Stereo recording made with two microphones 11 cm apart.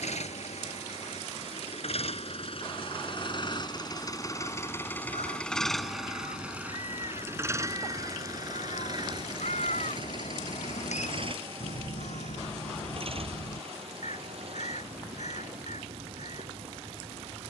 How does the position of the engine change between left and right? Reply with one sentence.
In this clip you hear the engine move from left to right.